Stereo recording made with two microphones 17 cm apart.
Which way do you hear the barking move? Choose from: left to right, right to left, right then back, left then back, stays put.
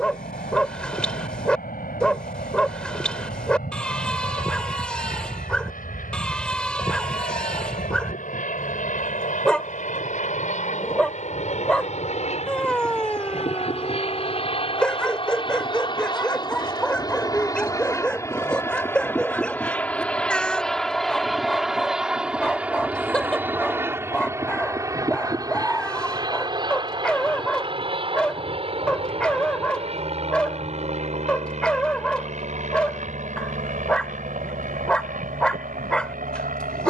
stays put.